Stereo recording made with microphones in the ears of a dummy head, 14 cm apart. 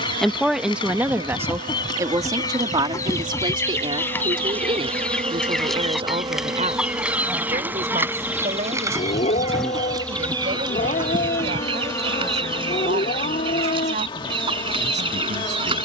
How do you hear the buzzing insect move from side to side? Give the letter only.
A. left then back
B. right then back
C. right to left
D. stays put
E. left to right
C.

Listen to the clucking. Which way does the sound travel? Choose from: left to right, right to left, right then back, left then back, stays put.
left to right.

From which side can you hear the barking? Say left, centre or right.
left.